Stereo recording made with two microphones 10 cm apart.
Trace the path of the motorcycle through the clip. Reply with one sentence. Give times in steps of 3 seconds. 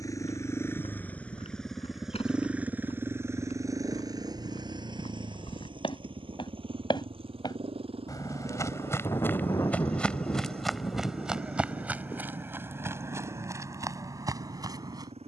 You can hear the motorcycle in the centre from 0 s and on the right from 3 s.